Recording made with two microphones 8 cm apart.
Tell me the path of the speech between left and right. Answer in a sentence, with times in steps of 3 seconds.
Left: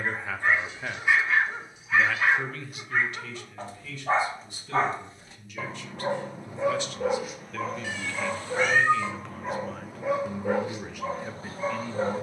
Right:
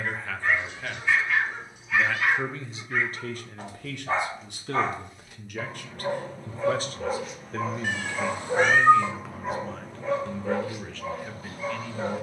In this clip you hear the speech in the centre from 0 s, on the right from 3 s and in the centre from 9 s.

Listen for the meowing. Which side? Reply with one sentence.
In this clip you hear the meowing on the right.